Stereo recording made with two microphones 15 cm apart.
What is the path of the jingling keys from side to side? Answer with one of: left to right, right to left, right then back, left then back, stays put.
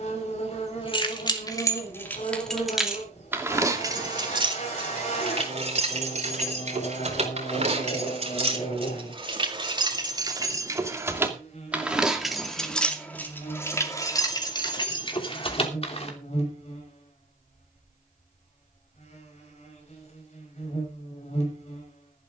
right then back.